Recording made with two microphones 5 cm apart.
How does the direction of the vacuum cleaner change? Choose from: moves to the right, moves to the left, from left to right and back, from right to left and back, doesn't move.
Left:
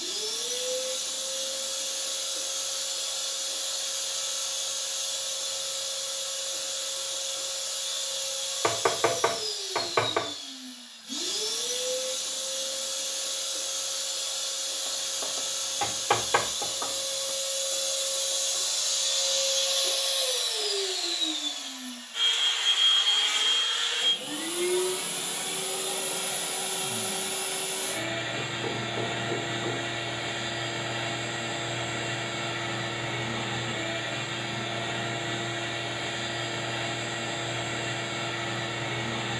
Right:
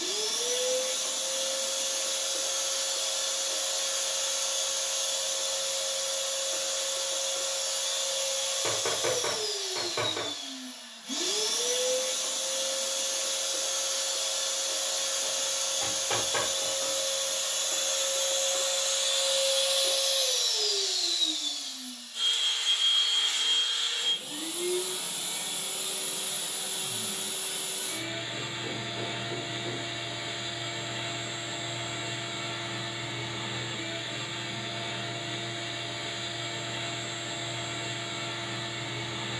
moves to the left.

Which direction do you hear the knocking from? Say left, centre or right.
left.